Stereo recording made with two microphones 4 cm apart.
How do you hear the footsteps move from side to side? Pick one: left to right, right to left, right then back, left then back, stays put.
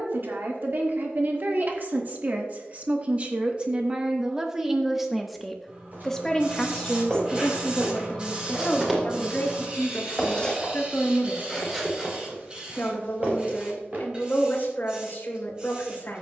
left then back.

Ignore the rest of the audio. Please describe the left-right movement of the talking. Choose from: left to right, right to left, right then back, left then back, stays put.
right to left.